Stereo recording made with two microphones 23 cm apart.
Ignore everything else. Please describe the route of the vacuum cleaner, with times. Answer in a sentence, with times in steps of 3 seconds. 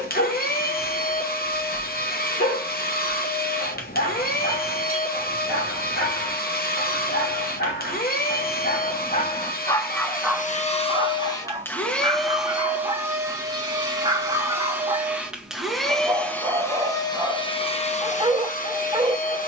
You can hear the vacuum cleaner on the left from 0 s, in the centre from 12 s and on the left from 18 s.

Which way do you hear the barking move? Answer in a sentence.
In this clip you hear the barking go from the left side to the right.